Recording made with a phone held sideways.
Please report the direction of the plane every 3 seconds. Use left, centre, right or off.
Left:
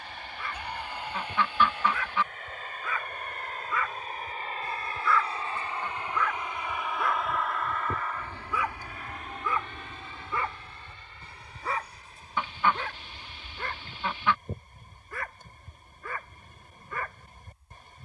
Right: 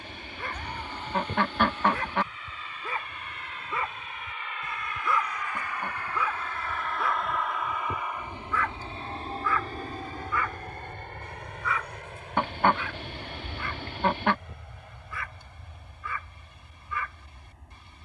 left, left, centre, right, right, right.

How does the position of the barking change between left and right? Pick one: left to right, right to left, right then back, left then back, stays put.
right to left.